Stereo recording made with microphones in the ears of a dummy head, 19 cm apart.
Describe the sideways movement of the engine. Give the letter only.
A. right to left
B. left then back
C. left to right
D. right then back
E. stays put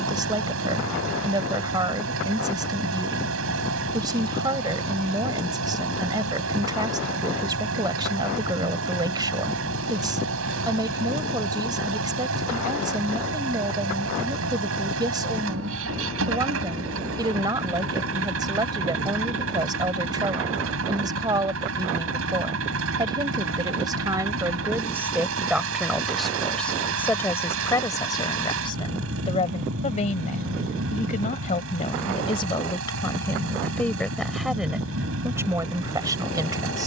E.